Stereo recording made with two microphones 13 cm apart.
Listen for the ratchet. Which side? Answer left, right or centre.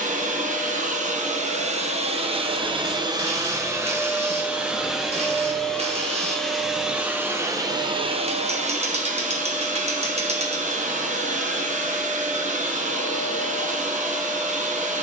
right.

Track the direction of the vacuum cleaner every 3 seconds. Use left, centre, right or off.
right, centre, right, right, right.